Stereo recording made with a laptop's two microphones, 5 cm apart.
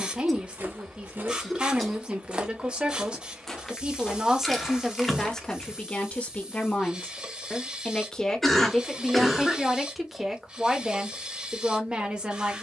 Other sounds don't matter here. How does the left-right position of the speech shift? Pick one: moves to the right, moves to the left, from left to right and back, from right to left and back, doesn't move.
from right to left and back.